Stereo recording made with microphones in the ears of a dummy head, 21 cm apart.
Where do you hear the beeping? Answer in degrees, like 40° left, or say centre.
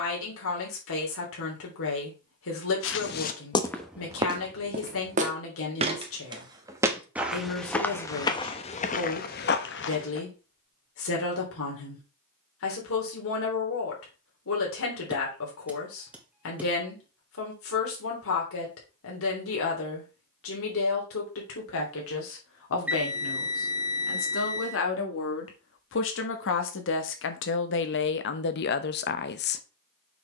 10° right.